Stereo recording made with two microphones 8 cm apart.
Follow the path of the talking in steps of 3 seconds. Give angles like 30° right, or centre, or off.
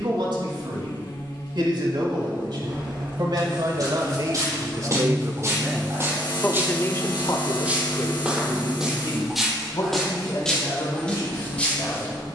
70° right, 50° right, 50° left, 80° left.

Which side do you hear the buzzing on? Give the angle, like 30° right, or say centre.
70° left.